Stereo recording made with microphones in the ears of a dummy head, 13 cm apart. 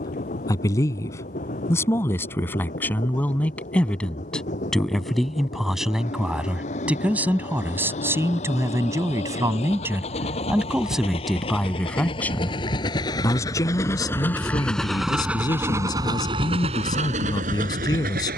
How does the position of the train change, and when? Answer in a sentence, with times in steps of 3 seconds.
You can hear the train on the left from 0 s and on the right from 15 s.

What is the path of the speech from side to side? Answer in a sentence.
In this clip you hear the speech move from left to right and back again.